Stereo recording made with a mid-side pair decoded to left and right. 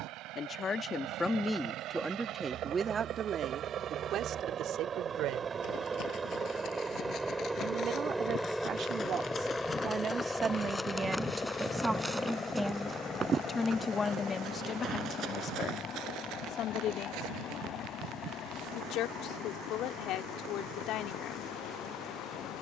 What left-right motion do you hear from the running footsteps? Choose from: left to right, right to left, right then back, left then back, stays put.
left to right.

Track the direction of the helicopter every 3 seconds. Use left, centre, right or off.
right, right, centre, centre, left, left, left, left.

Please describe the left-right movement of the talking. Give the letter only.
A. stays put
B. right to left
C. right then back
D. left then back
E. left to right
C.